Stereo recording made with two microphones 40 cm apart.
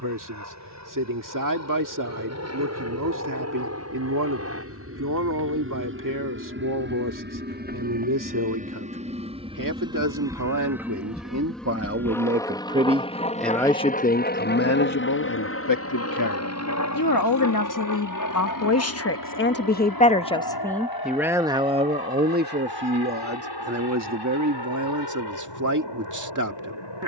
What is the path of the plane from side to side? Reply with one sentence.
You can hear the plane travel towards the left.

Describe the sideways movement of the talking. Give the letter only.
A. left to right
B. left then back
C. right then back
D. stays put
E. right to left
B.